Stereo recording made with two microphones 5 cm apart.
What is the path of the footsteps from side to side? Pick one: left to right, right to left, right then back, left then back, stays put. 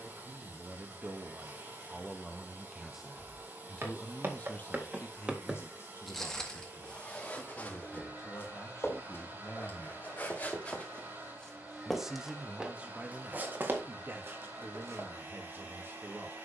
left then back.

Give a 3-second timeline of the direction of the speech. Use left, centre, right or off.
right, left, left, left, right, right.